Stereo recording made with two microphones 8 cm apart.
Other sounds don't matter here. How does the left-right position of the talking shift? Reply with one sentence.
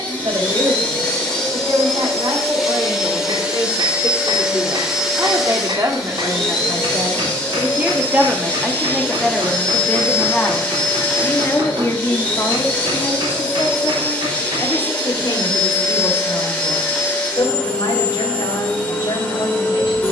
In this clip you hear the talking move from right to left.